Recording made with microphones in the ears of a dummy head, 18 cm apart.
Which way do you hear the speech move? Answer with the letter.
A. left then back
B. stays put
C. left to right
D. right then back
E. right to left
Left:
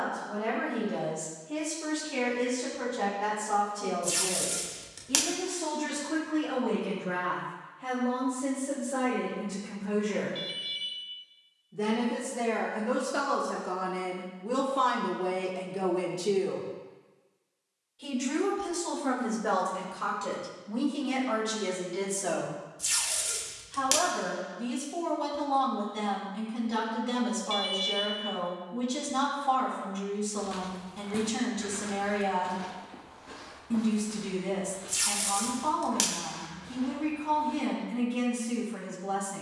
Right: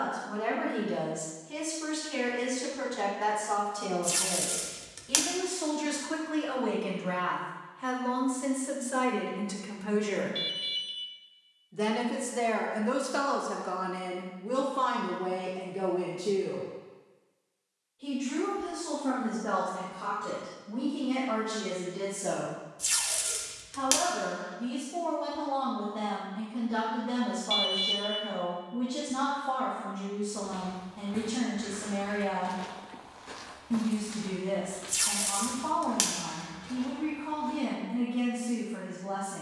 E.